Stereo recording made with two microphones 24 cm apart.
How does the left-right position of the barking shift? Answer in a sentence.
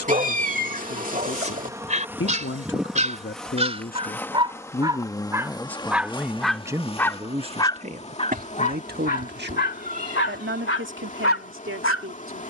You can hear the barking go from the right side to the left.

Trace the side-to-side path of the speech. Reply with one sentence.
You can hear the speech go from the left side to the right.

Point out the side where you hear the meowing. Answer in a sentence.
In this clip you hear the meowing on the right.